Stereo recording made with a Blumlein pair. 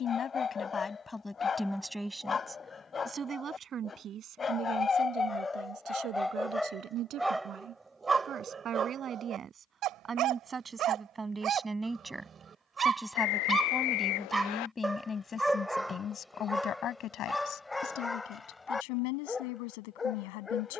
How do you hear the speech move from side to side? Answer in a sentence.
In this clip you hear the speech move from left to right and back again.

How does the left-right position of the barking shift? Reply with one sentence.
You can hear the barking move from left to right and back again.